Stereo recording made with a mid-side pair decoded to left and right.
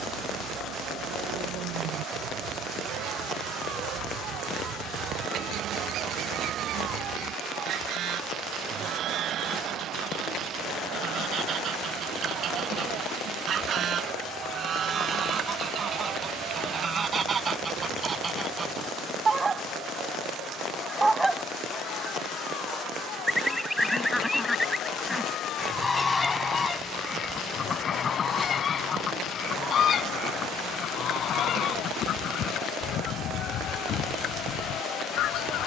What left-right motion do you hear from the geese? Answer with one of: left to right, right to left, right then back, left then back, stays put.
right to left.